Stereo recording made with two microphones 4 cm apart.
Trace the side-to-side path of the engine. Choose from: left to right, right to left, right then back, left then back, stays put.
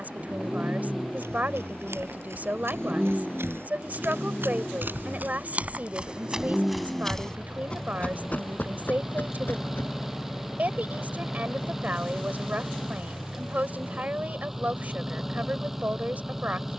stays put.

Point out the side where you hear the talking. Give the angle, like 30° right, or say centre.
40° right.